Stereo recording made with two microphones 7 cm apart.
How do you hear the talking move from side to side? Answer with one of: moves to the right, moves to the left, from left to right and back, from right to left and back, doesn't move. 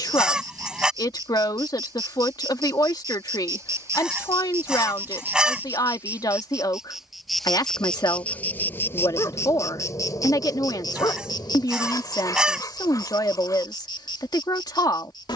doesn't move.